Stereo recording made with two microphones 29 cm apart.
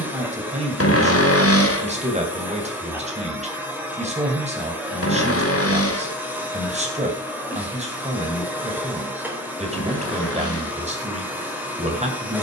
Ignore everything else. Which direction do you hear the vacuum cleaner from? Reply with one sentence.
You can hear the vacuum cleaner in the centre.